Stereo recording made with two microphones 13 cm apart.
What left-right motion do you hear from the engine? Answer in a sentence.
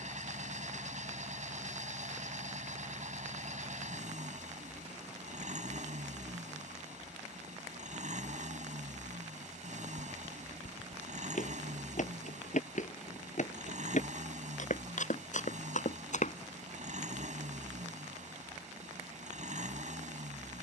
You can hear the engine stay in one place.